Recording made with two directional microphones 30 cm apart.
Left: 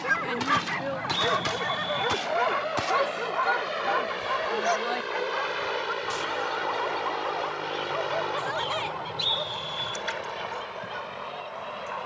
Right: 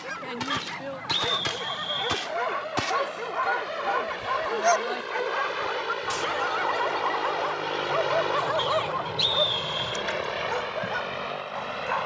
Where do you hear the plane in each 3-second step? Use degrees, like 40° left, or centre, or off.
40° left, 20° left, 10° right, 50° right.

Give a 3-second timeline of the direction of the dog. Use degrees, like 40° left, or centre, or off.
30° left, 10° right, 40° right, 50° right.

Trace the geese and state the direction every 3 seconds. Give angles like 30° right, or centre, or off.
centre, 30° right, 10° right, 10° left.